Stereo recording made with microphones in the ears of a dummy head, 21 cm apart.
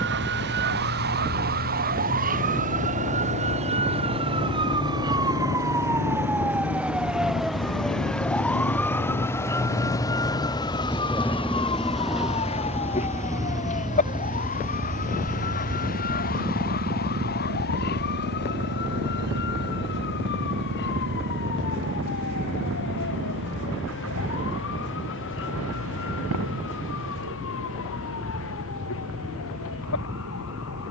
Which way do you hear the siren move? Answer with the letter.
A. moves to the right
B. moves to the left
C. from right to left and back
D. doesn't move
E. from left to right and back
B.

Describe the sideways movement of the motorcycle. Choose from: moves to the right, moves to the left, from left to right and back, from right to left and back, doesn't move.
moves to the right.